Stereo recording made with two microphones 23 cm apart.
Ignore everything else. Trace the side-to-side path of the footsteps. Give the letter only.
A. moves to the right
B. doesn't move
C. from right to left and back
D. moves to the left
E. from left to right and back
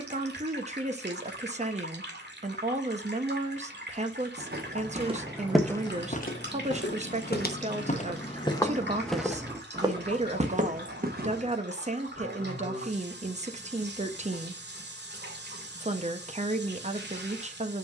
C.